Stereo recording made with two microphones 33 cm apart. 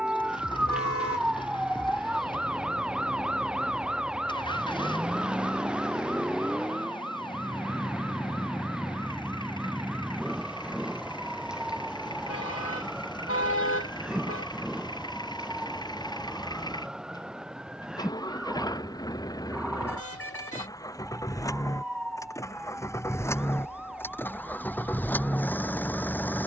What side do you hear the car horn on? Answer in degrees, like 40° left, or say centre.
40° left.